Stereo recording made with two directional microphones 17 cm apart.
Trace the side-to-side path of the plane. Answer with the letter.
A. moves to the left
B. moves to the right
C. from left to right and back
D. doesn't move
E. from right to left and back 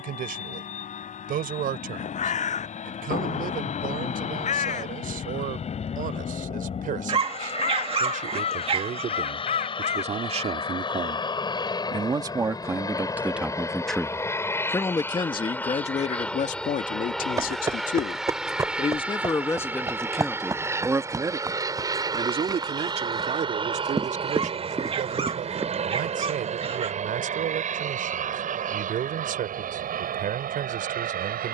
B.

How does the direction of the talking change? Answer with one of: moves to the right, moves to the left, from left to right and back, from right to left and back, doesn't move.
from right to left and back.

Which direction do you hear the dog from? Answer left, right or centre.
right.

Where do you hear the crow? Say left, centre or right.
left.